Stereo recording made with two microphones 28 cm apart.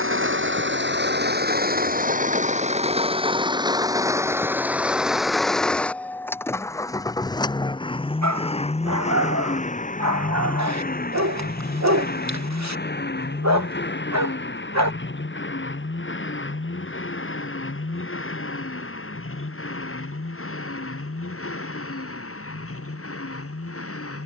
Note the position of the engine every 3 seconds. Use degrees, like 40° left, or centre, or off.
30° right, 10° right, 10° left, 30° left, 40° left, 40° left, 50° left, 50° left.